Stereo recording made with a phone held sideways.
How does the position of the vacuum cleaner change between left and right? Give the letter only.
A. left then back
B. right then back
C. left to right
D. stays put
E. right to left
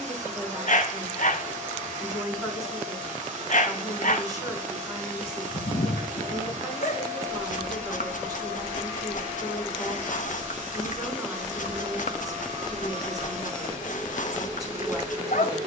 D.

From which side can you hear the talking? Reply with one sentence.
You can hear the talking on the right.